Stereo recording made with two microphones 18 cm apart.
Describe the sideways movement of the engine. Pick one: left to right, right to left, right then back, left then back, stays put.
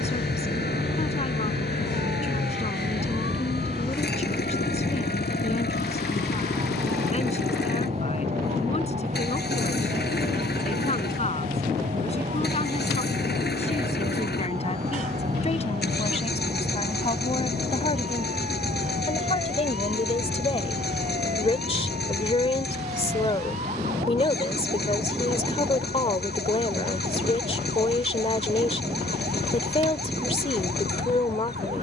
stays put.